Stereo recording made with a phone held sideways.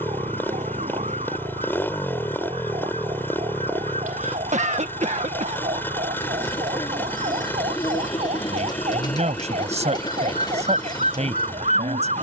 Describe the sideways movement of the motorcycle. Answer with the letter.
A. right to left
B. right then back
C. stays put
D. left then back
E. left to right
C.